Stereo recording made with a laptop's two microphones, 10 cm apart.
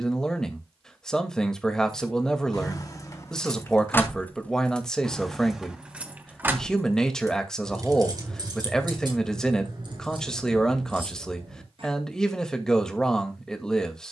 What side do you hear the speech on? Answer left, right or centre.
centre.